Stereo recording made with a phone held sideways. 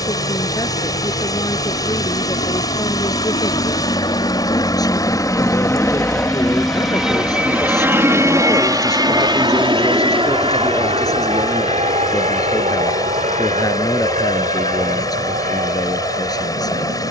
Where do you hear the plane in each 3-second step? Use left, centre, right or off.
left, left, centre, right, right, right.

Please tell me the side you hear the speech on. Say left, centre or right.
left.